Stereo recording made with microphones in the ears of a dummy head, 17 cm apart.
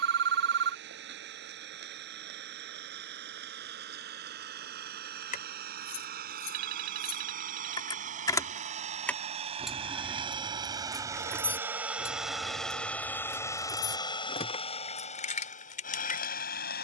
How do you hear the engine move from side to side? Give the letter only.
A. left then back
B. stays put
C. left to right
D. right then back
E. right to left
E.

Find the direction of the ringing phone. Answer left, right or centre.
right.